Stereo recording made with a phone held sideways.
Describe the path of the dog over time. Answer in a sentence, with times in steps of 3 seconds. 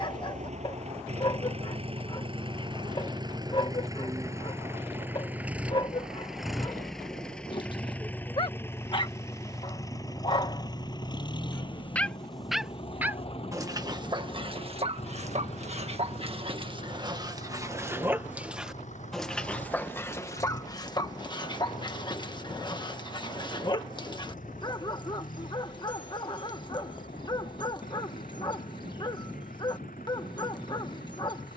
In this clip you hear the dog on the left from 0 s, on the right from 12 s, in the centre from 18 s and on the left from 21 s.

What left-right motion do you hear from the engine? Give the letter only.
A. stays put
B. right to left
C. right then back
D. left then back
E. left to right
B.